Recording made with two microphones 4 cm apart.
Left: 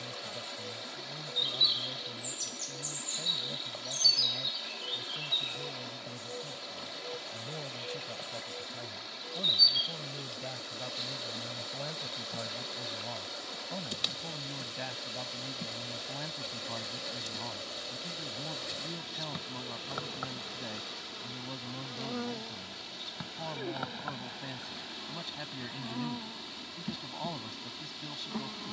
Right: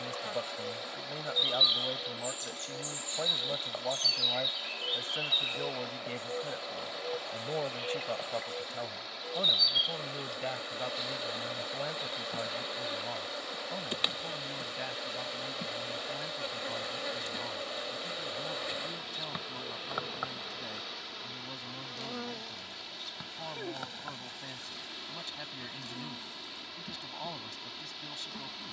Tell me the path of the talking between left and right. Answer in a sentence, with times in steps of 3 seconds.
In this clip you hear the talking on the right from 0 s and in the centre from 12 s.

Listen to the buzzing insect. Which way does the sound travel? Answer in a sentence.
In this clip you hear the buzzing insect move from right to left.